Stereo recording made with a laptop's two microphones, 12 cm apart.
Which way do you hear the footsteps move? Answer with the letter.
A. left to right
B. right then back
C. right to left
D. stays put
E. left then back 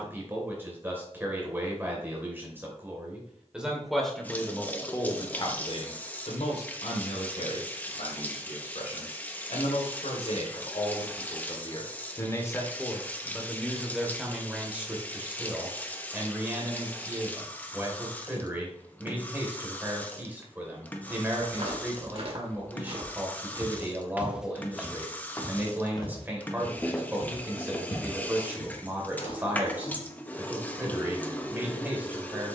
C.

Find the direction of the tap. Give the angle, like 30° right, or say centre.
10° left.